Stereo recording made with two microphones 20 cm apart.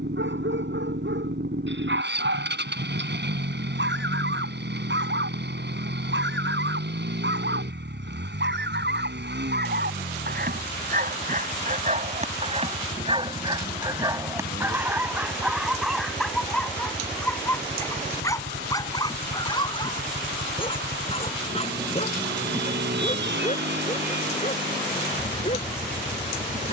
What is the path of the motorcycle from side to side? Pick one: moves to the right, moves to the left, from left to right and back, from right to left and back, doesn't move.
doesn't move.